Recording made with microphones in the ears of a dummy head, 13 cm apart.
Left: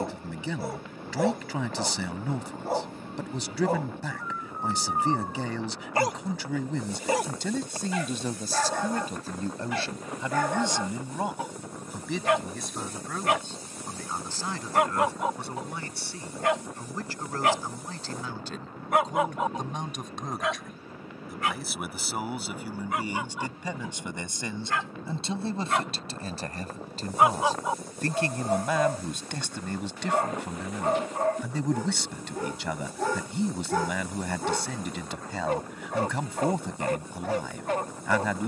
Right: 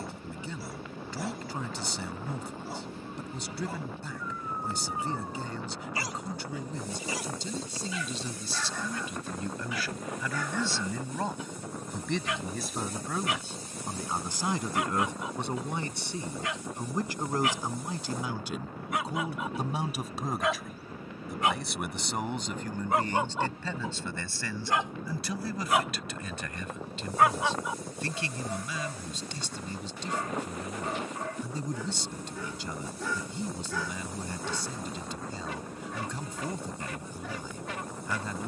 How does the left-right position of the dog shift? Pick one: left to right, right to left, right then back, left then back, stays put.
right then back.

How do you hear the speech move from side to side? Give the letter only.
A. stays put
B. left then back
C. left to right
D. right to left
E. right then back
E.